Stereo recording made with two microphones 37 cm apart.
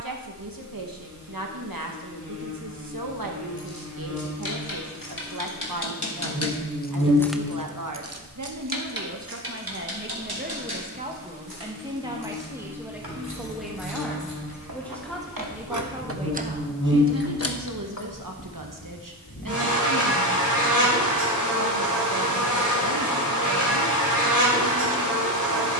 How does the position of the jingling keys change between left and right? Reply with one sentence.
You can hear the jingling keys move from left to right and back again.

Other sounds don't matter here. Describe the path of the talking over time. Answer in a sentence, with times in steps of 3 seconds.
In this clip you hear the talking on the right from 0 s, in the centre from 12 s and on the right from 15 s.